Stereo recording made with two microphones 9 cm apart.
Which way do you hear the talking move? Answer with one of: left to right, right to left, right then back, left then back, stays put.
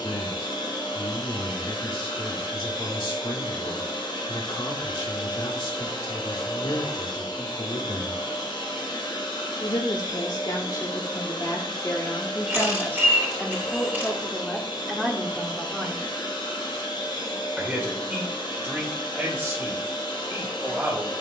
left to right.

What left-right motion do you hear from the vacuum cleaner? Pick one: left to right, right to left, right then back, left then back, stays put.
stays put.